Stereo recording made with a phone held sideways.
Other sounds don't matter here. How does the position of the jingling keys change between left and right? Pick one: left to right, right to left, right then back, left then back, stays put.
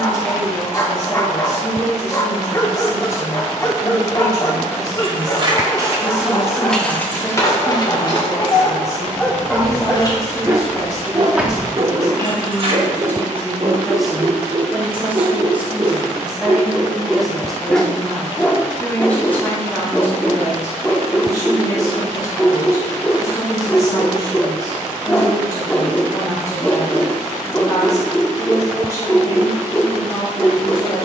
left then back.